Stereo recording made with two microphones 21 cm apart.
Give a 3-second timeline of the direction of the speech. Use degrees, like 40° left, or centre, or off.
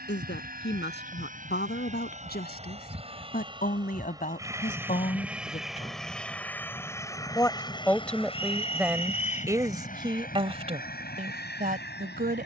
50° left, 40° left, 10° left, 30° right.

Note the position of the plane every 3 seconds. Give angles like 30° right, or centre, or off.
40° right, 10° right, 20° left, 40° left.